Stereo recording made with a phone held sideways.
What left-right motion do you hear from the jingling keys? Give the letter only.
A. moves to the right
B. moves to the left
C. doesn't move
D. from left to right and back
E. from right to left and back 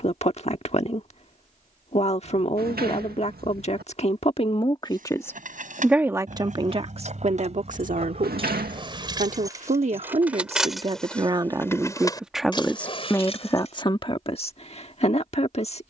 B.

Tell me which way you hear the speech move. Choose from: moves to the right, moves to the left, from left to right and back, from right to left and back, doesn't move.
from left to right and back.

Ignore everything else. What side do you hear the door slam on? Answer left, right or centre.
right.